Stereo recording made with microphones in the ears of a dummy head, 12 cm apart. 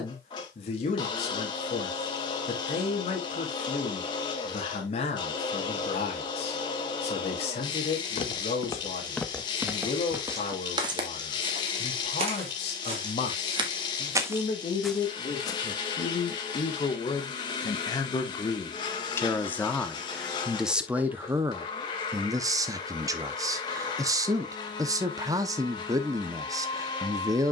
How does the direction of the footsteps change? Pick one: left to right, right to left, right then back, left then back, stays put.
right then back.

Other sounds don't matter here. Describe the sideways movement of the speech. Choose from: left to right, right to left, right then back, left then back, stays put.
left to right.